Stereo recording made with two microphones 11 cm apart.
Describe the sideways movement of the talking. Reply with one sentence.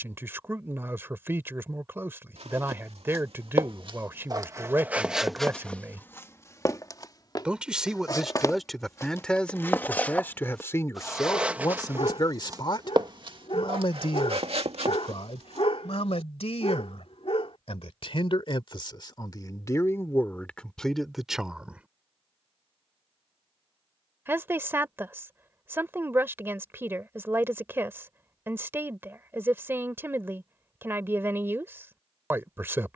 You can hear the talking go left and come back.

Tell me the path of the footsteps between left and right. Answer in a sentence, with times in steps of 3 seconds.
In this clip you hear the footsteps on the right from 0 s, on the left from 6 s, in the centre from 9 s, on the right from 12 s and not at all from 18 s.